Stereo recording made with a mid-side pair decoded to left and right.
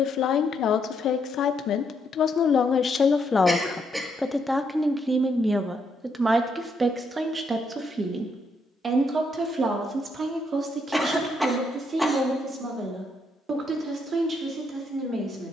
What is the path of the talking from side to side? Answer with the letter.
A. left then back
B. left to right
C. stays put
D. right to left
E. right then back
B.